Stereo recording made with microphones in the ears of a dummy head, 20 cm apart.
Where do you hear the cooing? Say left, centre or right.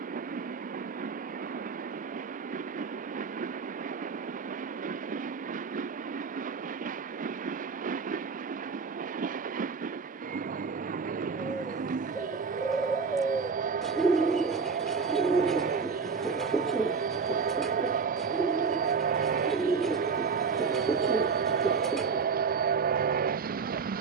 centre.